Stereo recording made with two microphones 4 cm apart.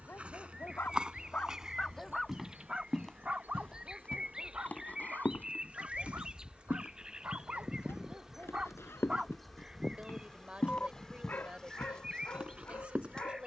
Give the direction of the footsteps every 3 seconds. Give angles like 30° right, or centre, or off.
20° right, 30° left, 60° left, 30° left, 30° right.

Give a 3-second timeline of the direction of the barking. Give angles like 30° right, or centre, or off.
30° left, 40° right, 40° right, 20° left, 50° left.